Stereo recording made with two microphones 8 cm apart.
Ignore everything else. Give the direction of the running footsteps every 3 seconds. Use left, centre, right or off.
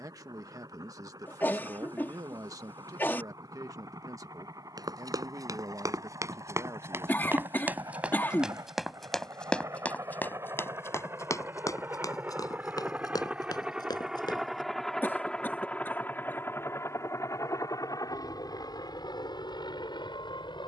off, right, right, left, left, off, off.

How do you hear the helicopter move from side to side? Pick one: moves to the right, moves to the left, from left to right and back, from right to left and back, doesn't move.
moves to the left.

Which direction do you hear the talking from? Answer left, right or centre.
right.